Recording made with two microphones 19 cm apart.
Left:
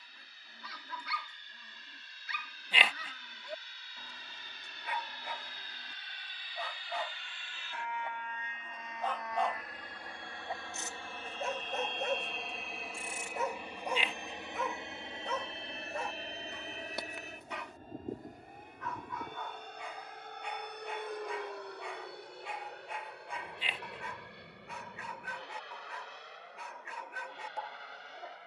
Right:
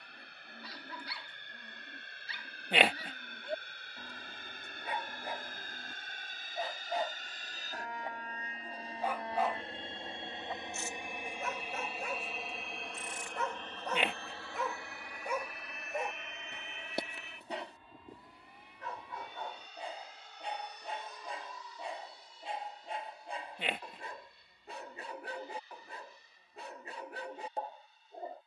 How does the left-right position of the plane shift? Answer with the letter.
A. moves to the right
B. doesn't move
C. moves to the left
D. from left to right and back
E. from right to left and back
C.